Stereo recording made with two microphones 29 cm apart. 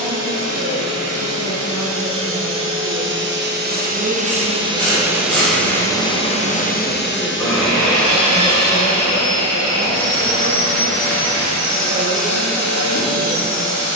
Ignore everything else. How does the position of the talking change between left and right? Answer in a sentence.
You can hear the talking move from right to left.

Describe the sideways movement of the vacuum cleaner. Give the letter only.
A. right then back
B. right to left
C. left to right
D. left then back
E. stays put
B.